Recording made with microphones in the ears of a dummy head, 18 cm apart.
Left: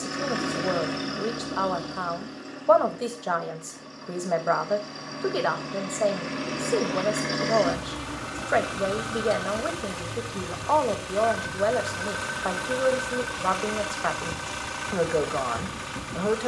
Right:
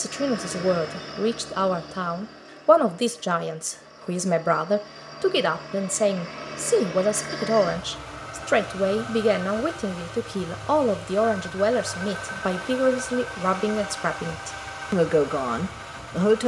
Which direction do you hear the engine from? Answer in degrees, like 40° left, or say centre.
60° left.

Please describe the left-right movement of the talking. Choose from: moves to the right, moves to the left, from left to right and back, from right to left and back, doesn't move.
doesn't move.